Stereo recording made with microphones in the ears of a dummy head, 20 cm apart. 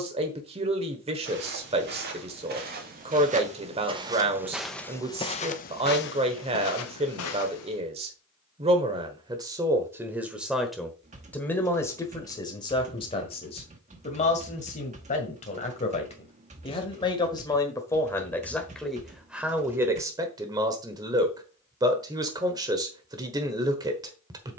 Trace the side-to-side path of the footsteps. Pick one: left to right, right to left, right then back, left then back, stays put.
right to left.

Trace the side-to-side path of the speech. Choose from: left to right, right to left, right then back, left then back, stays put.
left then back.